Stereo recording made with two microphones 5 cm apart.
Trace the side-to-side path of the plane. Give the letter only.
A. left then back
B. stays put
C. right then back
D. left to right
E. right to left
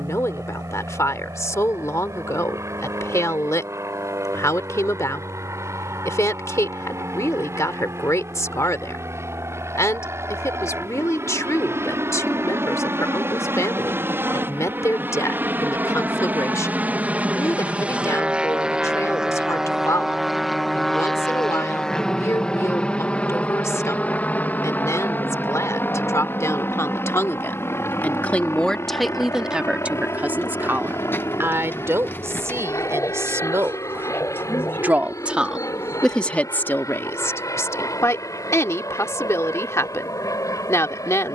E.